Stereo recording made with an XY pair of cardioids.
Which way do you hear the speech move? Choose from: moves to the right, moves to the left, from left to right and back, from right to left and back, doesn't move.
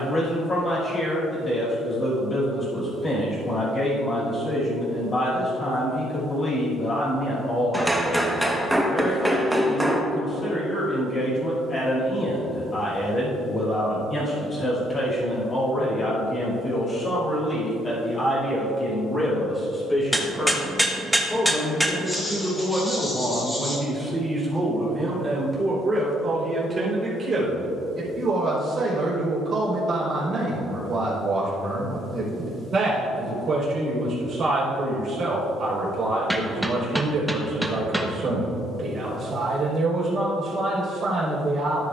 moves to the right.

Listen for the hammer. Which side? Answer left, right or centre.
centre.